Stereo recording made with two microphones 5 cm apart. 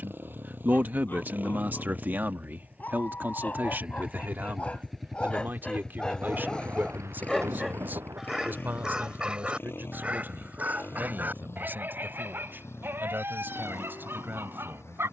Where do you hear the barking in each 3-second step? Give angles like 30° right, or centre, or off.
50° left, 30° left, centre, 40° right, 60° right.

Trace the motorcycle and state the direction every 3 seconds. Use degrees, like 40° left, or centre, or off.
40° right, 10° right, 40° left, 60° left, 70° left.